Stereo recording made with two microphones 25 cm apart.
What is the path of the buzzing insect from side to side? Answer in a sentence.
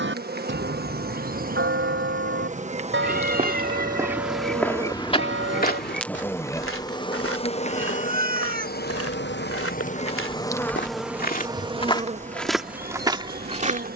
In this clip you hear the buzzing insect move from right to left and back again.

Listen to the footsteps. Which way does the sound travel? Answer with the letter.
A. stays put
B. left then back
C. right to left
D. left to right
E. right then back
B.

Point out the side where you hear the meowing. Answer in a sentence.
You can hear the meowing on the right.